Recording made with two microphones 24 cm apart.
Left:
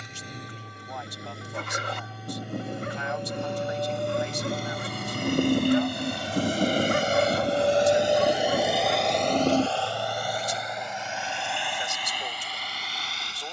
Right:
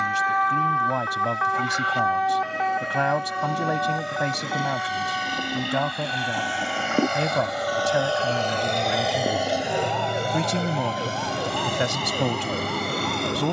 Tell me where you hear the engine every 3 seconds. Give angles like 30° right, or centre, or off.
70° left, 60° left, 30° left, 30° right, 50° right.